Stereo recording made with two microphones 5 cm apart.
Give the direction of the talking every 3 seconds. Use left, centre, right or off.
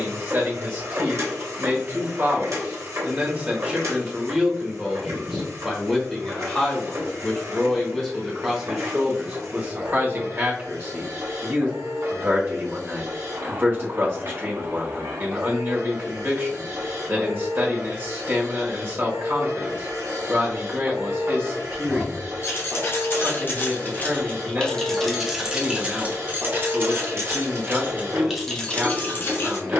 right, centre, centre, right, right, right, right, right, right, right.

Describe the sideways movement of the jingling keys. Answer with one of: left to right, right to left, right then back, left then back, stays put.
right then back.